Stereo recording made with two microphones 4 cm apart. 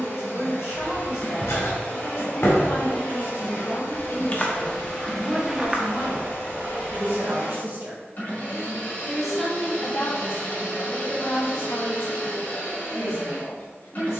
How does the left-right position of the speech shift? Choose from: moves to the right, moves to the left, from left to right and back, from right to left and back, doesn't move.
from left to right and back.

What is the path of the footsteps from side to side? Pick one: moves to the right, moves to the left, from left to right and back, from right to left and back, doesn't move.
moves to the right.